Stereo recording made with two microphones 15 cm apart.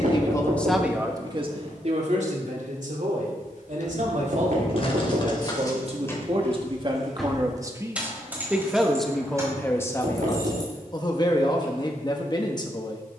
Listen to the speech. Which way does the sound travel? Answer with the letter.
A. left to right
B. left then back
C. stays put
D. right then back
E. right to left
D.